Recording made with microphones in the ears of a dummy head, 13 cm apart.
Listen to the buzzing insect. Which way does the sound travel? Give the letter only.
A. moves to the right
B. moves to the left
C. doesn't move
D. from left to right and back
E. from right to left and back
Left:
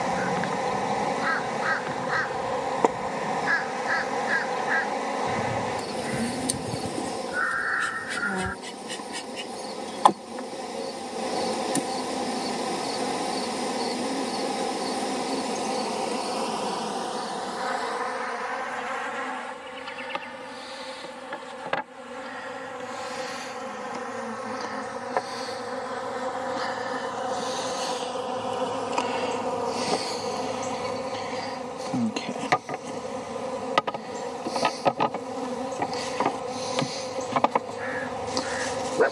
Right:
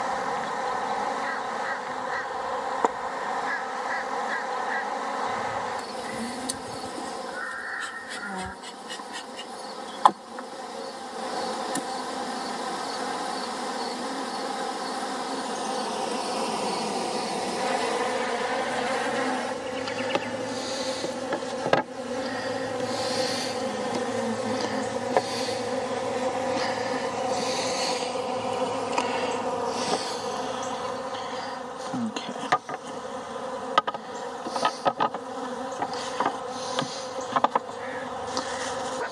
D.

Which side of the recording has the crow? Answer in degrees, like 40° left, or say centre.
60° left.